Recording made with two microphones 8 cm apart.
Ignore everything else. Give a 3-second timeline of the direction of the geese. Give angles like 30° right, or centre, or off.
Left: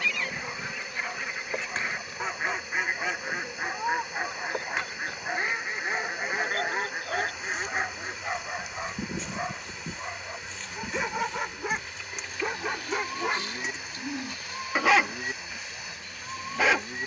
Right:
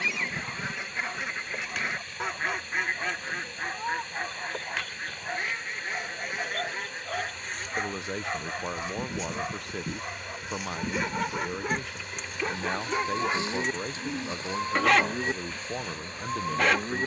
10° right, 20° left, 40° left, 10° right, 30° right, 30° right.